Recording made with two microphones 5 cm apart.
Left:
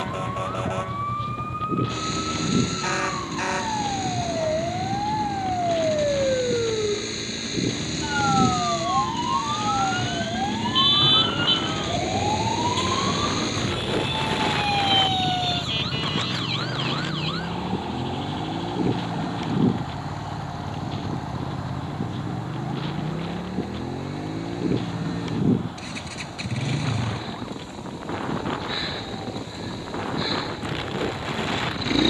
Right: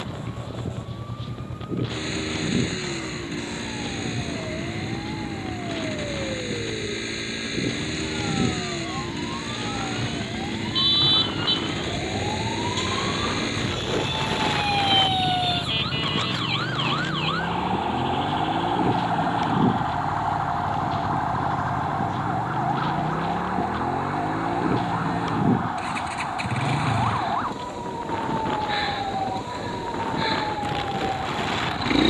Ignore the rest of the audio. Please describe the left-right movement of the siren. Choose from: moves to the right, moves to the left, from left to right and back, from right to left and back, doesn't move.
moves to the right.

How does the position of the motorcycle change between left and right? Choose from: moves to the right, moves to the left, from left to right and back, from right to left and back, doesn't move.
doesn't move.